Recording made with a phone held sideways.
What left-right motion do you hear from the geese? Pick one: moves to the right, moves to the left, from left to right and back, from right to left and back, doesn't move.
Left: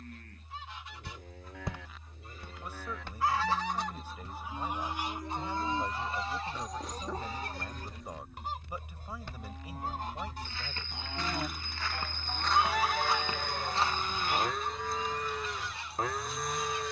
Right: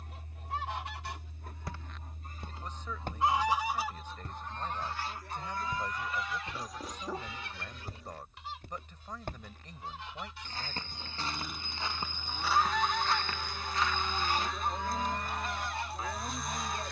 from right to left and back.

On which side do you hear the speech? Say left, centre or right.
centre.